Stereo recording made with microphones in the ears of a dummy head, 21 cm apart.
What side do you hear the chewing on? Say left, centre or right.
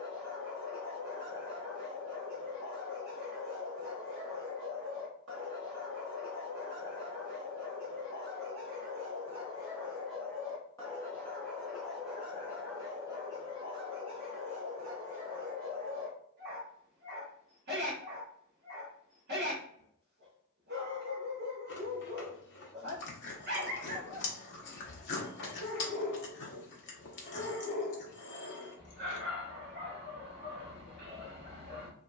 left.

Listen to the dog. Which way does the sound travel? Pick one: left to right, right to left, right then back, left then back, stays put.
left then back.